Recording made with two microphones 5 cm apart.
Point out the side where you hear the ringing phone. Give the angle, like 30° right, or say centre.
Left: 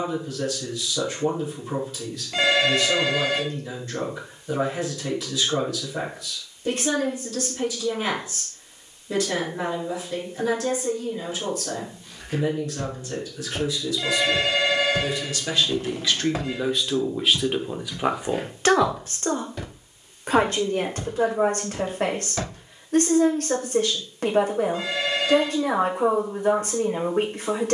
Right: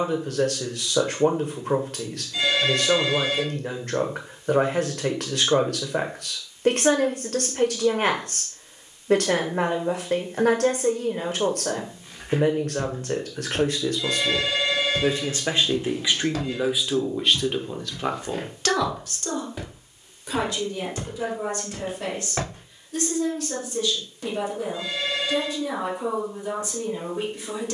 70° left.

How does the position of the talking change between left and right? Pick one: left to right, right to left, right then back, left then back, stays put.
right to left.